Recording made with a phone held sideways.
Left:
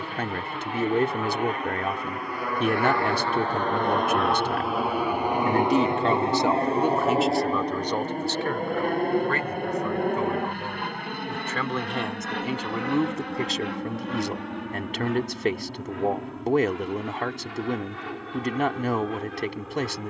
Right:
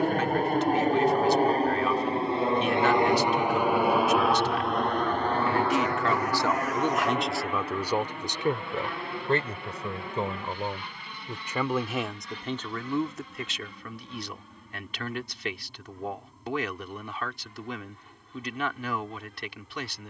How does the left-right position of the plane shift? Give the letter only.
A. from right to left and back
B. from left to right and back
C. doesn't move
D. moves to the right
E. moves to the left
E.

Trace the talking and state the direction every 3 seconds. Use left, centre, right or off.
left, left, centre, right, left, left, left.